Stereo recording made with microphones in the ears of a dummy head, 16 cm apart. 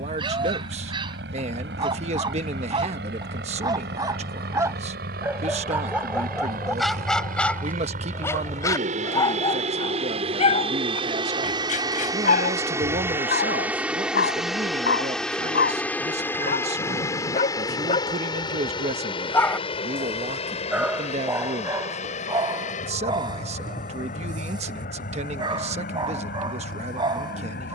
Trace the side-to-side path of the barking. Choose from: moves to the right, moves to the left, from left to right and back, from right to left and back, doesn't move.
from right to left and back.